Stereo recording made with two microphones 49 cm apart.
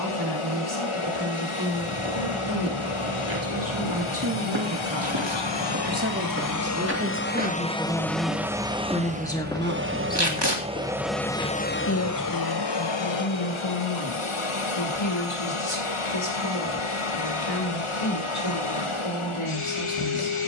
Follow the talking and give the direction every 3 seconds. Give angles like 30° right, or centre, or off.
50° right, 40° right, 20° right, 20° left, 50° left, 70° left, 70° left.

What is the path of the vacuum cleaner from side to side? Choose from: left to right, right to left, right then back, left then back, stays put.
right then back.